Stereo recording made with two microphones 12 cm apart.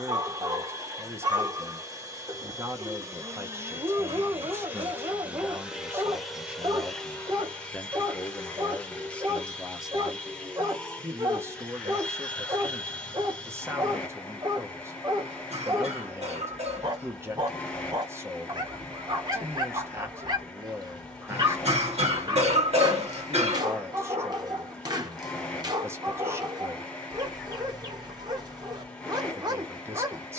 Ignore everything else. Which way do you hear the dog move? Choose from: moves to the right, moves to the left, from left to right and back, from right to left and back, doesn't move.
doesn't move.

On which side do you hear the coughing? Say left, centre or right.
right.